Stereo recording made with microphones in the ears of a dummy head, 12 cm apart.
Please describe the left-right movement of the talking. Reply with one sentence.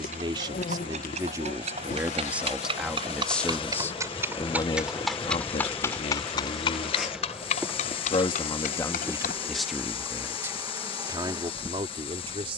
You can hear the talking go left and come back.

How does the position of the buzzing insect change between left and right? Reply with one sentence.
You can hear the buzzing insect move to the right.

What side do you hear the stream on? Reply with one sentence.
In this clip you hear the stream on the left.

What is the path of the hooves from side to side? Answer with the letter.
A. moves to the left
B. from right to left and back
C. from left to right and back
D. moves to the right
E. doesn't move
A.